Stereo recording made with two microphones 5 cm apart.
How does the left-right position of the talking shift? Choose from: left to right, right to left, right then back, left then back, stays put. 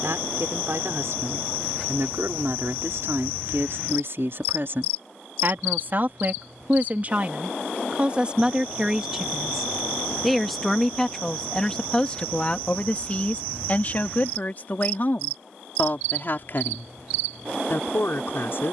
right to left.